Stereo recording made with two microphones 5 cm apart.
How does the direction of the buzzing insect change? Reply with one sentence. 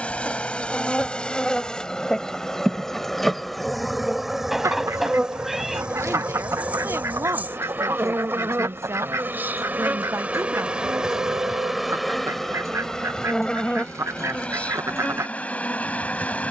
In this clip you hear the buzzing insect move from left to right and back again.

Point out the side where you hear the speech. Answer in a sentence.
In this clip you hear the speech on the right.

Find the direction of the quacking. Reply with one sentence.
You can hear the quacking on the right.